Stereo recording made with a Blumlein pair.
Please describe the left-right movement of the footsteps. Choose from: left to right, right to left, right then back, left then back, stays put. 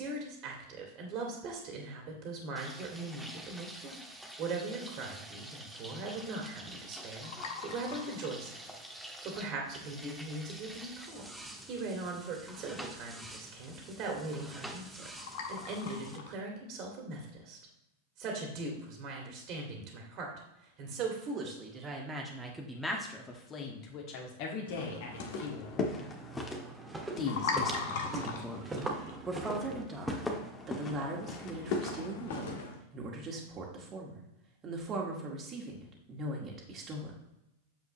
right then back.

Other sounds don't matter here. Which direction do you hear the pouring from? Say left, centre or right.
left.